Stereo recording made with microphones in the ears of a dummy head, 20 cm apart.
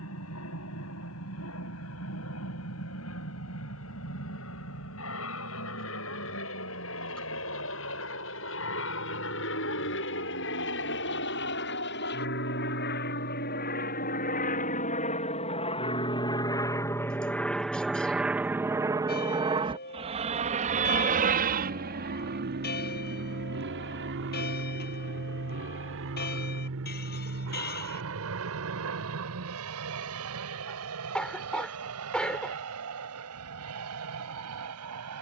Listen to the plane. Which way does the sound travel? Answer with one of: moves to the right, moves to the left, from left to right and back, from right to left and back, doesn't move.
moves to the right.